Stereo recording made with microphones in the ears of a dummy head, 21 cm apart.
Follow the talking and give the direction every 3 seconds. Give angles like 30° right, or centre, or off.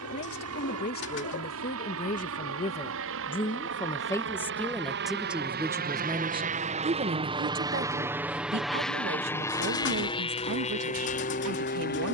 40° left, centre, 40° right, 60° right.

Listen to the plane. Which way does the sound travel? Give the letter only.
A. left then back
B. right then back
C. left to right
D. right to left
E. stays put
D.